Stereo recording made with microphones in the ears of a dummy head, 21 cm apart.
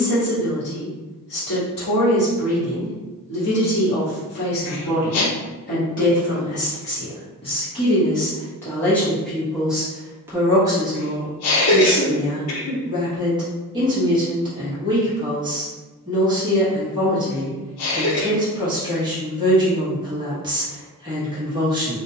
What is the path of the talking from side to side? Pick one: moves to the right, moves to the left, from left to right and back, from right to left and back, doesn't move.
moves to the right.